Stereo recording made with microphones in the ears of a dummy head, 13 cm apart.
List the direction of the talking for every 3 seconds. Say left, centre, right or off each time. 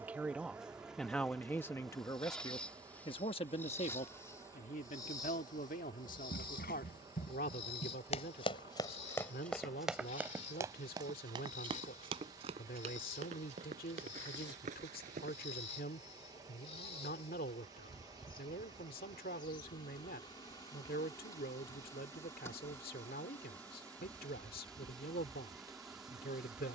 centre, left, left, left, left, left, left, left, left.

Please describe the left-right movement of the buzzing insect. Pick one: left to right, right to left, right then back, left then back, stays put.
left then back.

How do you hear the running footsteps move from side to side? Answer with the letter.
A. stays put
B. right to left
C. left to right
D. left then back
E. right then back
C.